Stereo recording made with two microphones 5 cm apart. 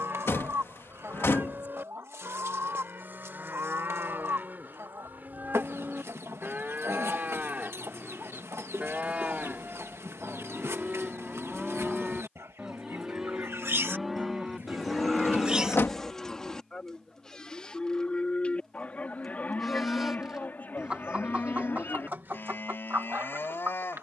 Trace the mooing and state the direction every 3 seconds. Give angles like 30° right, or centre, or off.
50° right, 40° right, 30° right, 20° right, centre, 20° left, 40° left, 50° left.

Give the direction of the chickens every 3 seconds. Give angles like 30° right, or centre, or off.
70° right, 70° right, 70° right, 70° right, 60° right, centre, centre, 40° right.